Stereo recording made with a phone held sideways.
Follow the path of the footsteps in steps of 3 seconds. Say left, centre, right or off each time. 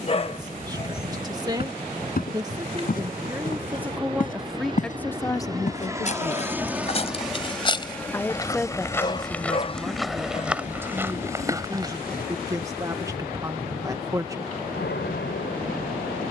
left, left, left, centre, off, off.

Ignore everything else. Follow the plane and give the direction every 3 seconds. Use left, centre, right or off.
right, right, centre, left, left, left.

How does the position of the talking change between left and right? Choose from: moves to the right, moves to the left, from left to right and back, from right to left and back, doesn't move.
from right to left and back.